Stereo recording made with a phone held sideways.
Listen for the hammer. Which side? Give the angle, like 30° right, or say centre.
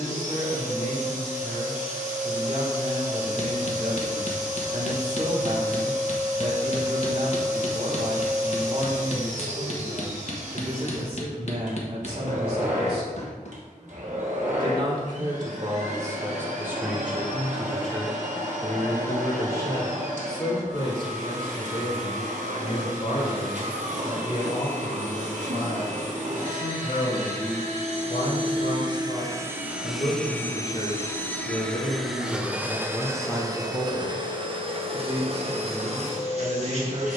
50° left.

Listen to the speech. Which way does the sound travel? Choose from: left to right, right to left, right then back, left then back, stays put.
left then back.